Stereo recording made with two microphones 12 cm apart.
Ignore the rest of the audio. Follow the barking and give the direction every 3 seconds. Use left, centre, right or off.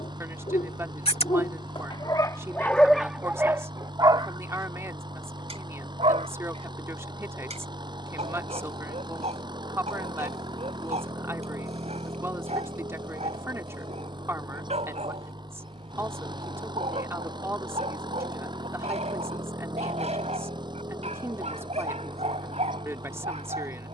left, right, right, right, right, right, right, right.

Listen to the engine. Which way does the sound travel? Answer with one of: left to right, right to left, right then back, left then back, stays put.
stays put.